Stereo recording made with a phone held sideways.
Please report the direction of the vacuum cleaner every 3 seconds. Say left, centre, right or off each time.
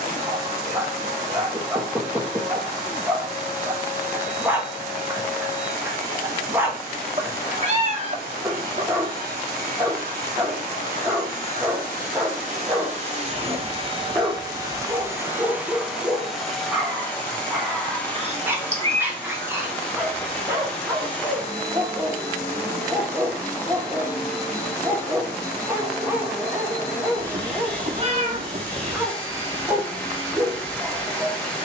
right, right, right, right, right, centre, centre, centre, centre, centre, centre.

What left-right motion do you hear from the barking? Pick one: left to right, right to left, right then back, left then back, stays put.
stays put.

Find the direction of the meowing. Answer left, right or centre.
right.